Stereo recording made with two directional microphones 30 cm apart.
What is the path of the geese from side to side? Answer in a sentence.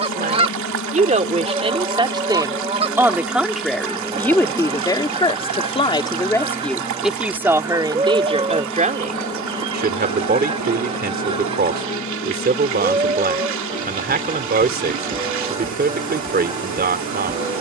You can hear the geese stay put.